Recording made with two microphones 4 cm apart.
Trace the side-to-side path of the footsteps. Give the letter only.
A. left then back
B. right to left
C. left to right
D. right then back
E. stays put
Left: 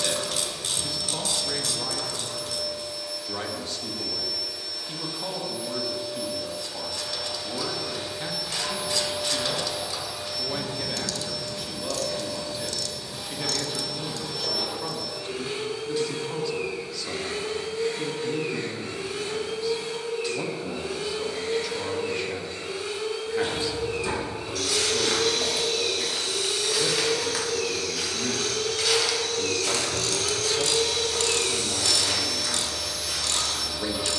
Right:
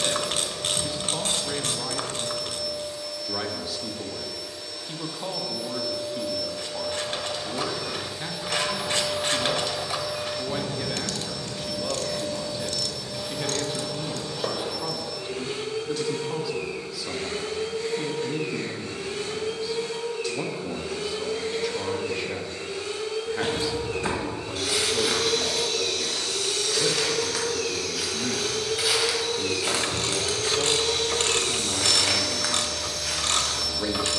A.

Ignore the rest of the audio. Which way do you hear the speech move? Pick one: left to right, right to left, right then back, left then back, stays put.
stays put.